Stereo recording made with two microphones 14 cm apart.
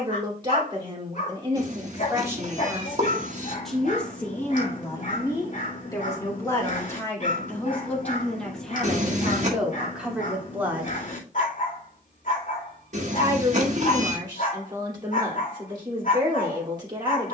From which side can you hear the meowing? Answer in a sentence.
You can hear the meowing on the right.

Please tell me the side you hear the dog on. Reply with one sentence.
You can hear the dog on the left.